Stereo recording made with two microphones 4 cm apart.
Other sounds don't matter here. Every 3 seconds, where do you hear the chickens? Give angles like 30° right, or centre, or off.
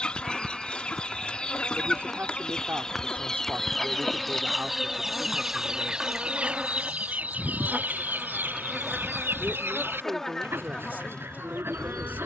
20° left, centre, 40° right, 70° right.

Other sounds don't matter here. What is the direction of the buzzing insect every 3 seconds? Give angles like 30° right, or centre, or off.
30° left, 10° left, 20° right, 10° left.